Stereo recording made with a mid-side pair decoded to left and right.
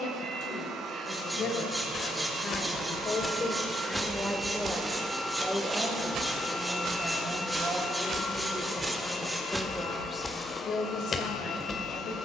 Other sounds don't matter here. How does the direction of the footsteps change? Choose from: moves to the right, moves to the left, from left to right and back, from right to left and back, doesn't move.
from left to right and back.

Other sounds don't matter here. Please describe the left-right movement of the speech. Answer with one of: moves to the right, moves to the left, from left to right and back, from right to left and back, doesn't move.
from left to right and back.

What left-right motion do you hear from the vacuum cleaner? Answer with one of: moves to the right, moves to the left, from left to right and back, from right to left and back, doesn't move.
moves to the left.